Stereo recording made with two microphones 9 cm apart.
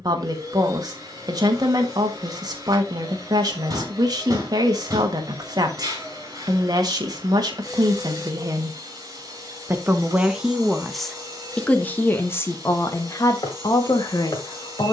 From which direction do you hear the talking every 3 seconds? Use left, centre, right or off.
right, right, right, centre, left.